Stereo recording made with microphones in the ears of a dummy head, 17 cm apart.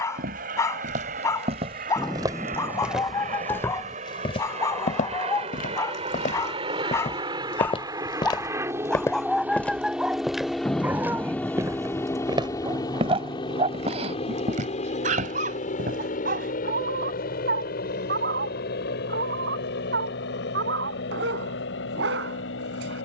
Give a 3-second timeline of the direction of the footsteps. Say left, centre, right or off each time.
right, left, left, centre, right, right, off, off.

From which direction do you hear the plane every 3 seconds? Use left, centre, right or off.
right, right, right, centre, left, left, left, left.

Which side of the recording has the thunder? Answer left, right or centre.
centre.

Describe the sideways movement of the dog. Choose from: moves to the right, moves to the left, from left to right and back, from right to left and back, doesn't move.
moves to the right.